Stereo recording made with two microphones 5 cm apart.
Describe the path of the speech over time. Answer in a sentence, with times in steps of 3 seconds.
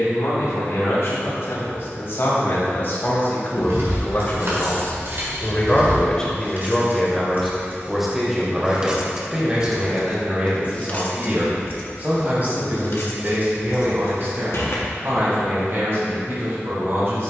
You can hear the speech on the left from 0 s, in the centre from 6 s and on the right from 9 s.